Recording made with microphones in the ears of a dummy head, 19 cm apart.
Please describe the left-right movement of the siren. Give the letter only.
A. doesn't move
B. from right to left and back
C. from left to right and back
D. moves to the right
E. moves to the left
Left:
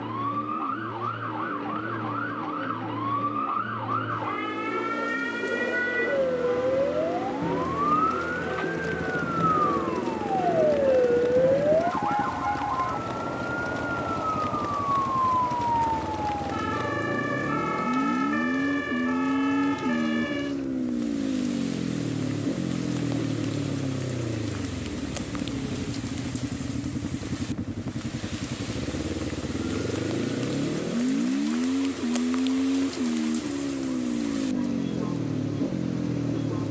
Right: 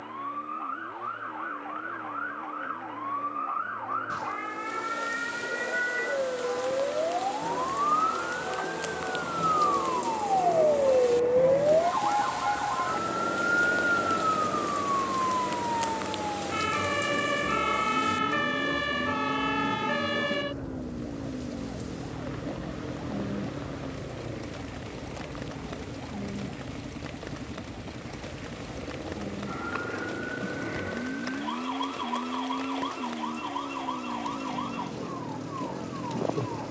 D.